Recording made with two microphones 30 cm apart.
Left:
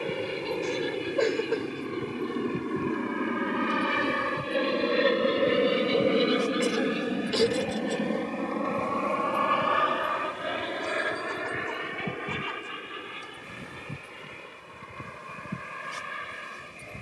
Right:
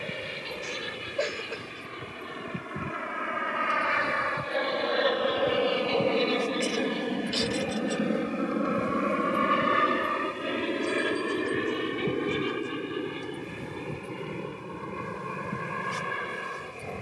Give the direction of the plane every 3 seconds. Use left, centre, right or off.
left, left, centre, right, right, right.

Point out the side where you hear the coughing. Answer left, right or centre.
left.